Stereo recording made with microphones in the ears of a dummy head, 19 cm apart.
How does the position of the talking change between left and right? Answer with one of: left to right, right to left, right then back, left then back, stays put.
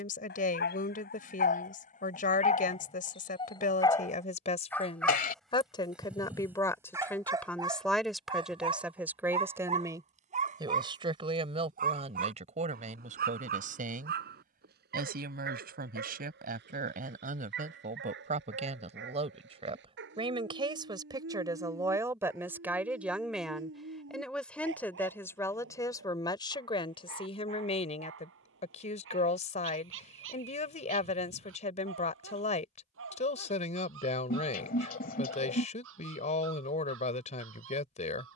right then back.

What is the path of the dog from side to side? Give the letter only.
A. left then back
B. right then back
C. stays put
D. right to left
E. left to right
E.